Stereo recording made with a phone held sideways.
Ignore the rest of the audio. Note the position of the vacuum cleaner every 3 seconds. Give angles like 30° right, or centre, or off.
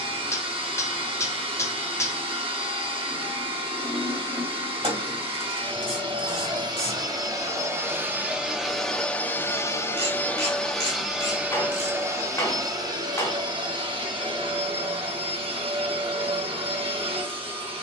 40° right, 40° right, 20° right, centre, 30° right, 40° right.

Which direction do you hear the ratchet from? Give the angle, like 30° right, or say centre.
40° right.